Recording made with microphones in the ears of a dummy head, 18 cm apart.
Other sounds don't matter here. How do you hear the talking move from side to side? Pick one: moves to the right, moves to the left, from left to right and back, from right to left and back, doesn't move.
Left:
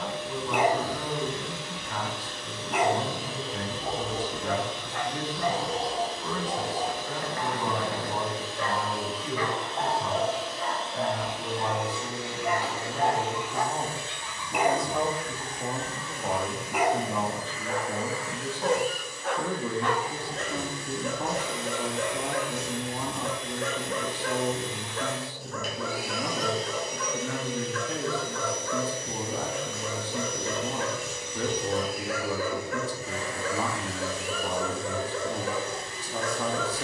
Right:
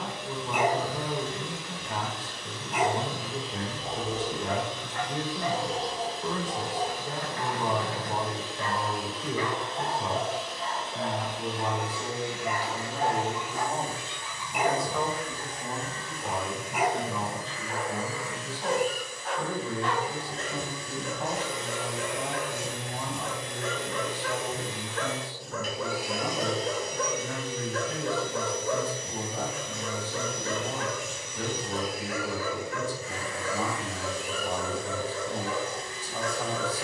moves to the left.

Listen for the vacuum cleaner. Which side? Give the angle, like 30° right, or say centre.
60° left.